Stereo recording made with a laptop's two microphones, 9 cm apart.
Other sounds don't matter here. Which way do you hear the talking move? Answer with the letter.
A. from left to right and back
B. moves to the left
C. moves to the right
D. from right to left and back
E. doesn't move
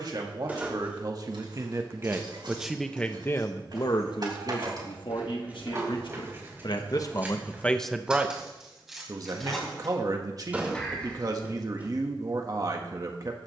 D.